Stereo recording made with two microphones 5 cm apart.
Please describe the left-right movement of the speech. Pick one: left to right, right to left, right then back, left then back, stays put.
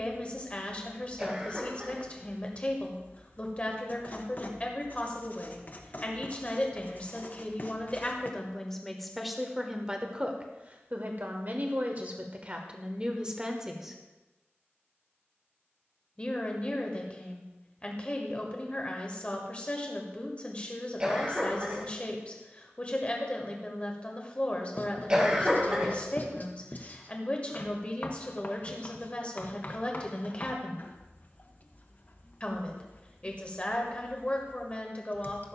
right then back.